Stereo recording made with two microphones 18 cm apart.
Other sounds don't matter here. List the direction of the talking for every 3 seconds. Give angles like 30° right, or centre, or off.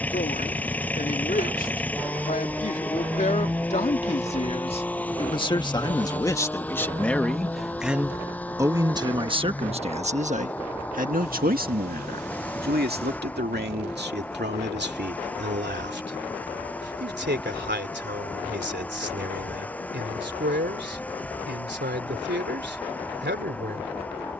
50° left, 30° left, centre, 40° right, 70° right, 80° right, 80° right, 80° right.